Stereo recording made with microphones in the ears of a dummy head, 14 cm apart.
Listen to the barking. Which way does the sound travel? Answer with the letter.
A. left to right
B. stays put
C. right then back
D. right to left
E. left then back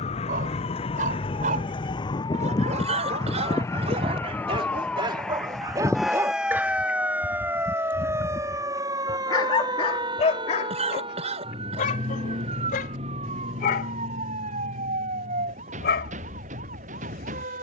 D.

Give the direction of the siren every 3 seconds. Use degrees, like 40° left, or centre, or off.
30° left, 10° left, 10° right, 30° right, 40° right, 50° right.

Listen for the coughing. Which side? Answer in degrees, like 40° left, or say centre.
40° right.